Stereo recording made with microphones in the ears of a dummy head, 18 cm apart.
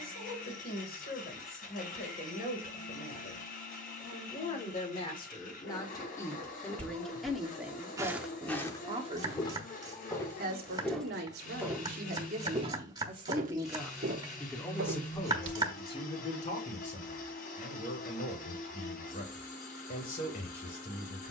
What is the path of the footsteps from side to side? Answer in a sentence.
In this clip you hear the footsteps move from right to left and back again.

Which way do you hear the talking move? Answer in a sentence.
In this clip you hear the talking move from left to right and back again.